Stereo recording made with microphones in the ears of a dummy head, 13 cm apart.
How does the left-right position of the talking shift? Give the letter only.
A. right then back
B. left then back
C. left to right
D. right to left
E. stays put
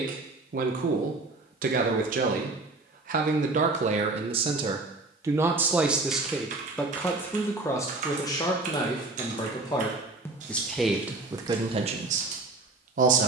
B.